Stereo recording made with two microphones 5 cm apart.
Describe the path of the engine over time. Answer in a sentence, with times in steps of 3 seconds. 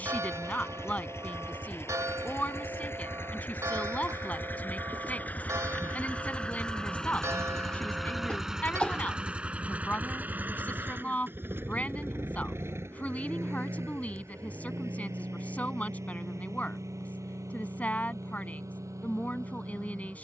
In this clip you hear the engine on the left from 0 s, in the centre from 6 s and on the right from 9 s.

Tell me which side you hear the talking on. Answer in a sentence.
You can hear the talking on the left.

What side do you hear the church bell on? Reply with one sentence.
In this clip you hear the church bell on the right.